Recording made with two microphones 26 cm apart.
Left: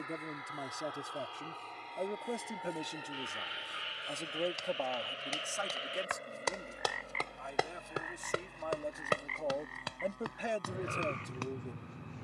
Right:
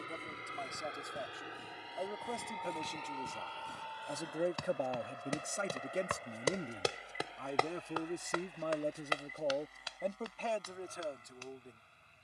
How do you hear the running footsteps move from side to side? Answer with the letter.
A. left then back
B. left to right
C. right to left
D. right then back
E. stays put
C.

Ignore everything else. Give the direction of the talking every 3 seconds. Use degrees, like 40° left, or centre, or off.
30° left, 10° right, 40° right, 10° left.